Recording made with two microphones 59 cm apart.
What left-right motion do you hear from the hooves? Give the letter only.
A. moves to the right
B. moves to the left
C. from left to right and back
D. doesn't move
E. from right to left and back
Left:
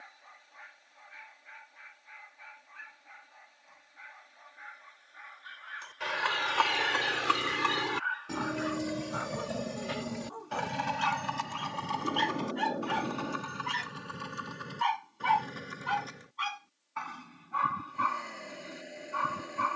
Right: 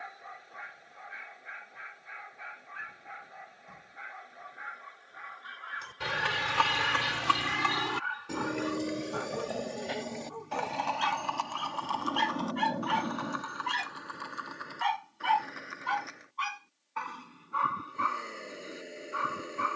B.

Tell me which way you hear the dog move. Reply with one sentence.
You can hear the dog move to the left.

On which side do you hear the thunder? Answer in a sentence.
In this clip you hear the thunder on the right.